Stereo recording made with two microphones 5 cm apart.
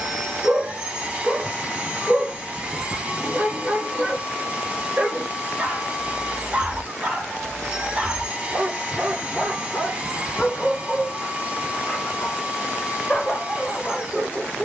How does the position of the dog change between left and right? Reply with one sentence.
You can hear the dog move from right to left.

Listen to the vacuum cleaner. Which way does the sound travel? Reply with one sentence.
In this clip you hear the vacuum cleaner stay in one place.